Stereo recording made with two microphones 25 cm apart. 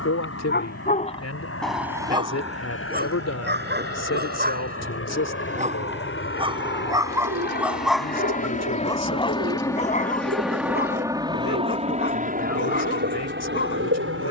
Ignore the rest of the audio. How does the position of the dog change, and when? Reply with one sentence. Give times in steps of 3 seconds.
In this clip you hear the dog in the centre from 0 s, on the right from 3 s, in the centre from 6 s and on the left from 9 s.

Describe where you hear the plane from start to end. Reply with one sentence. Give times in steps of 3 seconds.
You can hear the plane on the left from 0 s, in the centre from 9 s and on the right from 12 s.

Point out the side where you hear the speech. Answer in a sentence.
In this clip you hear the speech on the left.